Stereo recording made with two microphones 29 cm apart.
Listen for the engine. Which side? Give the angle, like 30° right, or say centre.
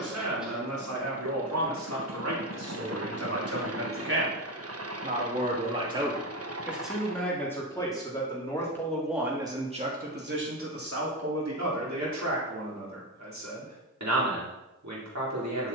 50° right.